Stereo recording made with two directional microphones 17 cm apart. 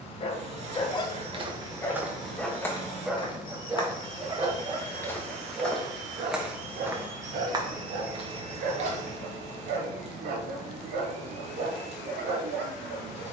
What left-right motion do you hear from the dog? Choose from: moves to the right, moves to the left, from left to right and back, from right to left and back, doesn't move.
moves to the right.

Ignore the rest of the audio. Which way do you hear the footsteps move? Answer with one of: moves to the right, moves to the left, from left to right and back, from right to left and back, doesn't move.
from right to left and back.